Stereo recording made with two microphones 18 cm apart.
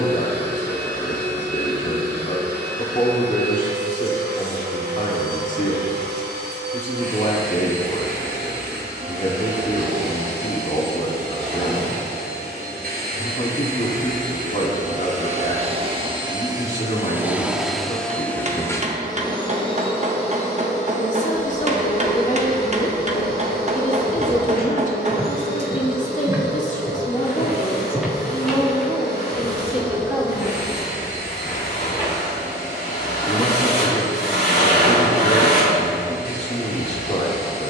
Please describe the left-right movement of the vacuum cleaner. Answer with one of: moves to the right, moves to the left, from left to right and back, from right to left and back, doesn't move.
moves to the left.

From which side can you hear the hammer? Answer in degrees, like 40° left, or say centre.
40° right.